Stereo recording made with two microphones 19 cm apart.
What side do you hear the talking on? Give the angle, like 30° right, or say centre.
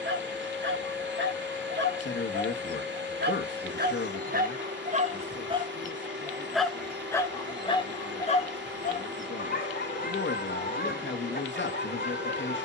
70° left.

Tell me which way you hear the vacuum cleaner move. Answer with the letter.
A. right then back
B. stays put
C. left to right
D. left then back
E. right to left
B.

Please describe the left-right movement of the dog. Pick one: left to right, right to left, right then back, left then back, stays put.
right to left.